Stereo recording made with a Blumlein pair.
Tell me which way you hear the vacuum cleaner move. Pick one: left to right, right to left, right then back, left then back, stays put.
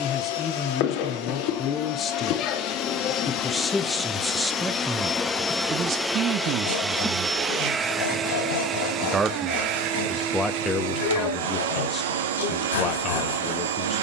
left to right.